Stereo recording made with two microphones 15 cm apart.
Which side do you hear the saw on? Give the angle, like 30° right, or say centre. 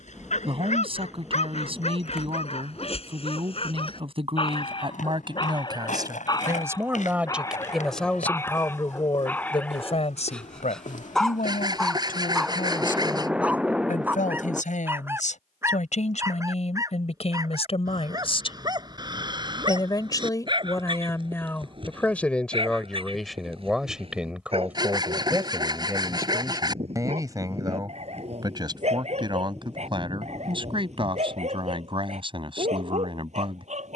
30° right.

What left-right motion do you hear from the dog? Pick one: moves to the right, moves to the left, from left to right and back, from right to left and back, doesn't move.
moves to the right.